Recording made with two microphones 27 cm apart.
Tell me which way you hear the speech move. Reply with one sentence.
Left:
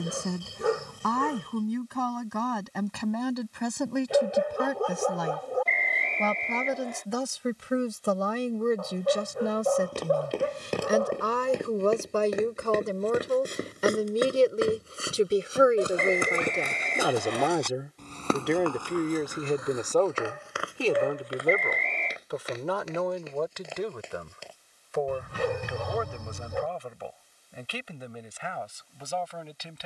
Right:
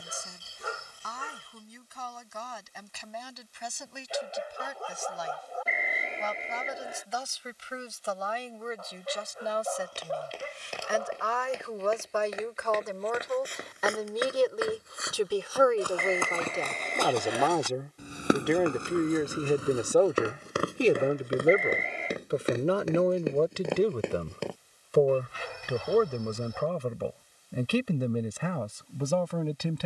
You can hear the speech travel towards the right.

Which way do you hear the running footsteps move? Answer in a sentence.
In this clip you hear the running footsteps move from left to right.